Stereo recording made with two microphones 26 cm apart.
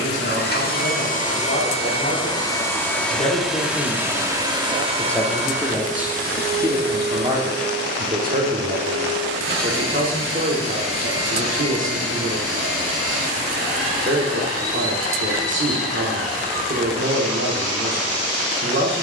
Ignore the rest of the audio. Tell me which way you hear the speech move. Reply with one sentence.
You can hear the speech move from left to right.